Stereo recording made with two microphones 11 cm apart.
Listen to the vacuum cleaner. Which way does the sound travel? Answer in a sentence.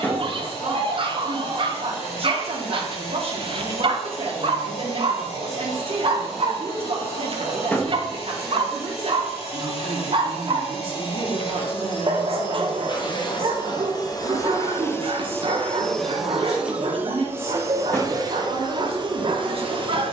You can hear the vacuum cleaner move from left to right.